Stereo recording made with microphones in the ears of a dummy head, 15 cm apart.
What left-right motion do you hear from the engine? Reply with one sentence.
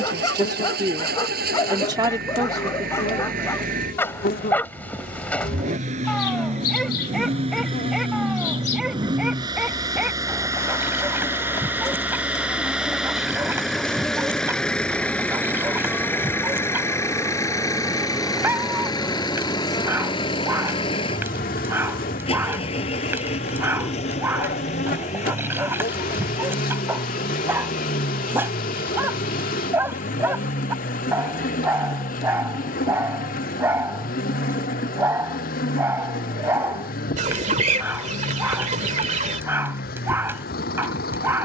In this clip you hear the engine travel towards the left.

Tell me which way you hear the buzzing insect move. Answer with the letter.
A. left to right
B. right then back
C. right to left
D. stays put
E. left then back
B.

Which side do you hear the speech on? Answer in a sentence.
You can hear the speech on the right.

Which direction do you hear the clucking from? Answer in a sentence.
You can hear the clucking on the right.